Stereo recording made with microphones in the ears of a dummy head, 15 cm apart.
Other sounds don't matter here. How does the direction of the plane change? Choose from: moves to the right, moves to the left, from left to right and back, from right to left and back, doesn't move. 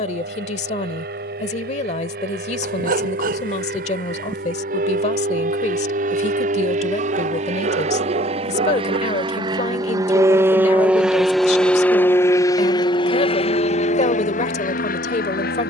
moves to the left.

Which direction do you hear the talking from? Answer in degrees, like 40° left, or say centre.
40° left.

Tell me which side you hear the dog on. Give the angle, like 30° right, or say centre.
50° right.